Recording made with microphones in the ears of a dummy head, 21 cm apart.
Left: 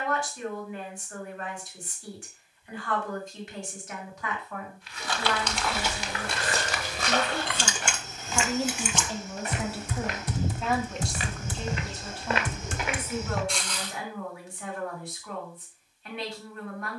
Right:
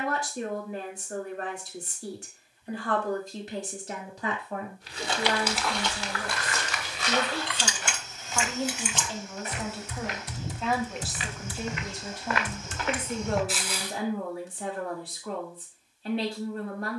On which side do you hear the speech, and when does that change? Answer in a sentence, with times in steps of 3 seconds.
You can hear the speech on the right from 0 s, in the centre from 6 s and on the right from 12 s.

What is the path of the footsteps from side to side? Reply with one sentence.
In this clip you hear the footsteps move from right to left and back again.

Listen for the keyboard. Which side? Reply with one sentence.
In this clip you hear the keyboard on the left.